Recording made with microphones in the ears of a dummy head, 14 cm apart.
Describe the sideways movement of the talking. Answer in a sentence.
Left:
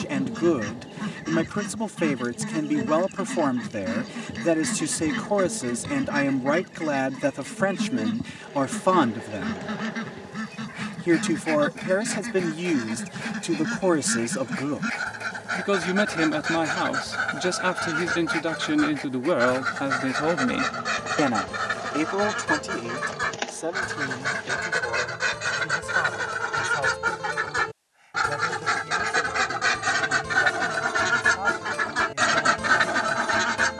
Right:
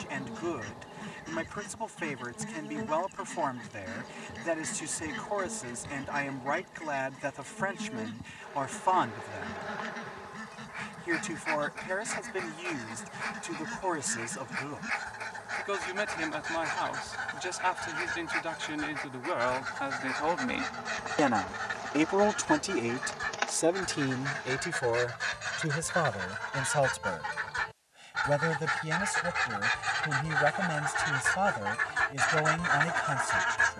You can hear the talking go from the left side to the right.